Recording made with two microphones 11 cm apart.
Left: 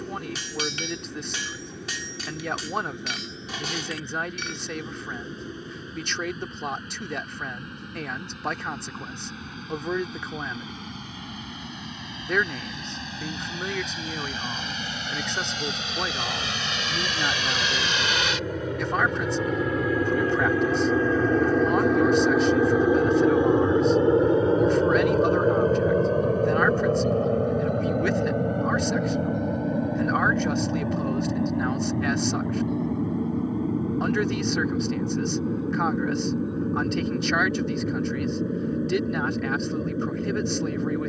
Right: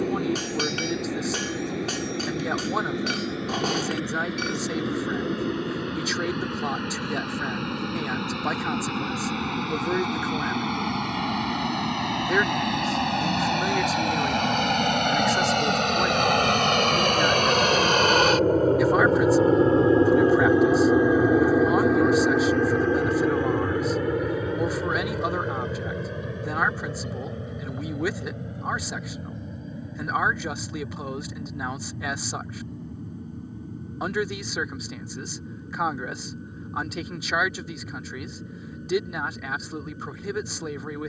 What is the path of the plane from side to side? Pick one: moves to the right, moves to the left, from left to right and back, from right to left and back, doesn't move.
moves to the left.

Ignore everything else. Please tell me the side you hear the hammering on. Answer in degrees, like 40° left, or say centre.
40° right.